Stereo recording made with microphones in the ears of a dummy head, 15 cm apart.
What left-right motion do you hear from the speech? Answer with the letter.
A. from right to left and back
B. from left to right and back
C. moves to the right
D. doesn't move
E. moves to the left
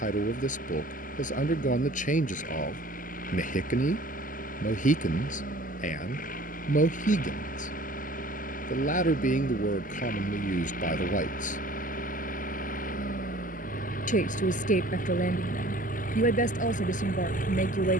D.